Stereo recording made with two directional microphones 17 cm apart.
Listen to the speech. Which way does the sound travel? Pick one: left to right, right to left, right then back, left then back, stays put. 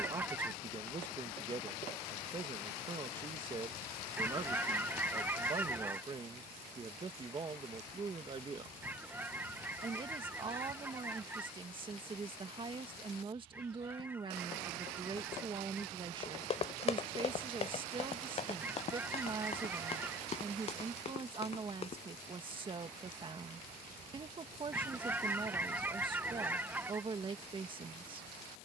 stays put.